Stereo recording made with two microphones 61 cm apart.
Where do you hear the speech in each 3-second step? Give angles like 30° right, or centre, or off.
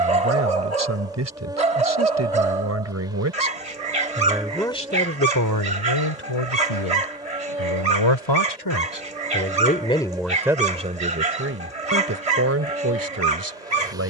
20° right, 10° left, 50° left, centre, 20° right.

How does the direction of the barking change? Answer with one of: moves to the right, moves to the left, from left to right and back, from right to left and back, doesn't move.
doesn't move.